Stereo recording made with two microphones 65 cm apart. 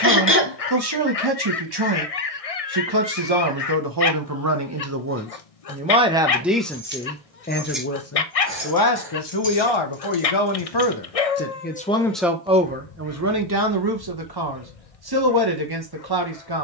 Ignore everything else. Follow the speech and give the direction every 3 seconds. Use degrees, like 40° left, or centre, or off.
40° right, 30° right, 10° left, 40° left, 20° right, 40° right.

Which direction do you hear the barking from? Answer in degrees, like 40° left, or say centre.
60° left.